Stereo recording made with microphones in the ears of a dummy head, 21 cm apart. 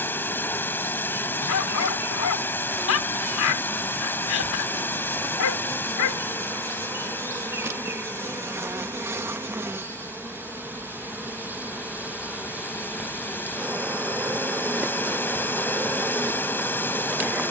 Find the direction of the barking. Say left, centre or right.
left.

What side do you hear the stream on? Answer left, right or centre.
centre.